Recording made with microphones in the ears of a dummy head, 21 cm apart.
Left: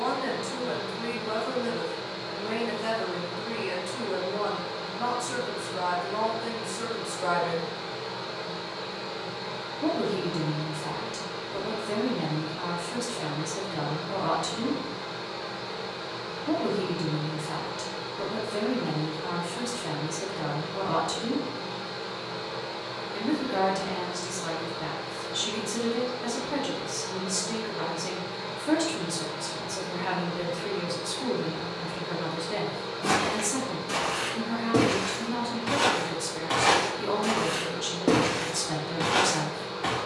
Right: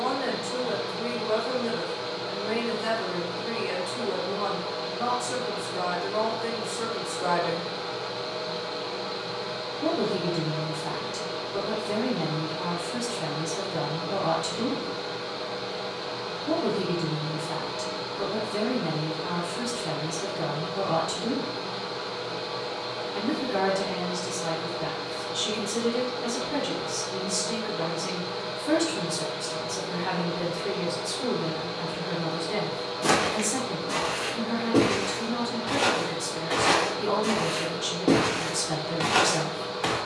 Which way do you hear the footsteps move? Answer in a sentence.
You can hear the footsteps go left and come back.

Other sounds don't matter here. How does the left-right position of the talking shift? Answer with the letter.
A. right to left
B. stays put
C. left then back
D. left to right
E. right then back
B.